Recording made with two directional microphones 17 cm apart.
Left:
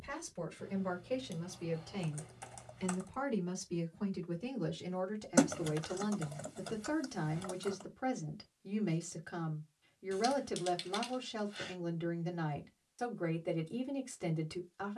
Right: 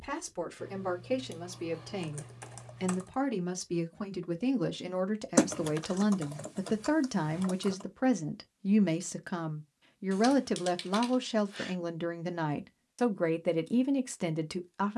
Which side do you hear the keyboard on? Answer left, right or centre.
right.